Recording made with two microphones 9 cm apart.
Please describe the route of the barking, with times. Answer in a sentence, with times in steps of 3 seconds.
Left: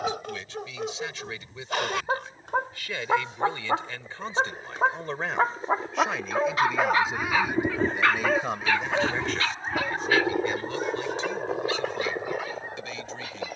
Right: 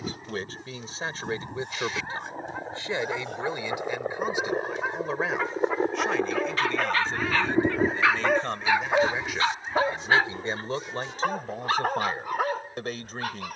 You can hear the barking on the left from 0 s, in the centre from 6 s and on the right from 9 s.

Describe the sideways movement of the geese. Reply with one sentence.
In this clip you hear the geese move from right to left.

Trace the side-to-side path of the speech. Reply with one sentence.
You can hear the speech move from right to left and back again.